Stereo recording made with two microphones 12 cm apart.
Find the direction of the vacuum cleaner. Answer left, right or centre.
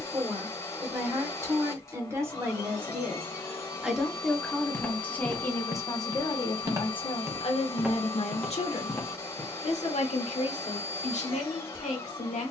left.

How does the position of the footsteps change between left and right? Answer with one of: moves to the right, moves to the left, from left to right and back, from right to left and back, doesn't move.
from left to right and back.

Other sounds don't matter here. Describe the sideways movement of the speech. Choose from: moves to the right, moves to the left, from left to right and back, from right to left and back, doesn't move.
moves to the left.